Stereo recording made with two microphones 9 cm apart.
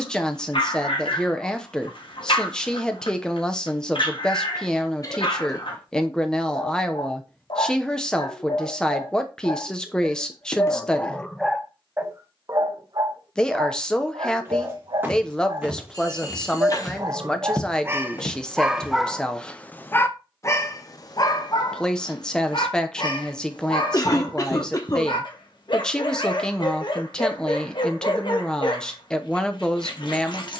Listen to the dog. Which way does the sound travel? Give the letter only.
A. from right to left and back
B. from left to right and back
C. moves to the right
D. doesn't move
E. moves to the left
B.